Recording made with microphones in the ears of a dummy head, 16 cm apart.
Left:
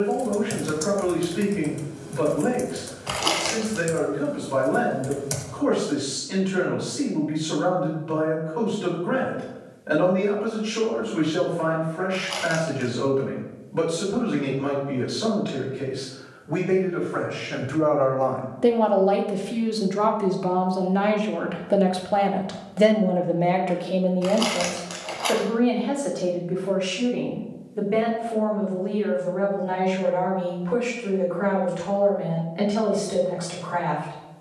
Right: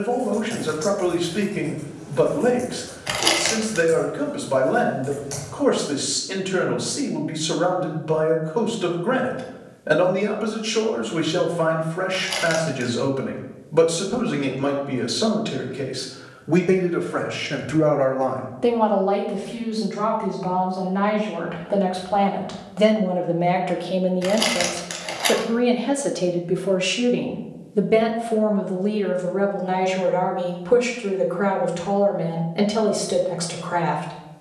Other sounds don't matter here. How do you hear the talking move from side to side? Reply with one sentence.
You can hear the talking move from right to left and back again.